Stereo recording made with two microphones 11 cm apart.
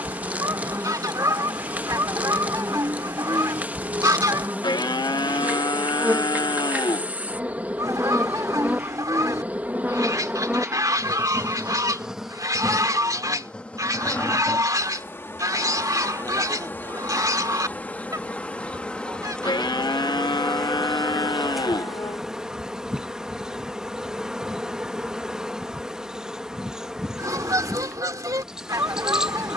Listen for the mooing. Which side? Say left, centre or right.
left.